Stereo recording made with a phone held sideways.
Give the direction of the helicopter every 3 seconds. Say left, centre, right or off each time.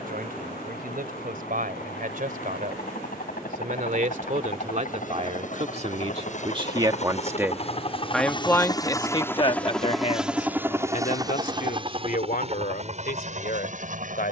left, left, left, centre, right.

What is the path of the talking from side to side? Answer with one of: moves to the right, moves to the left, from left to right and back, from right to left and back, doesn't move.
moves to the left.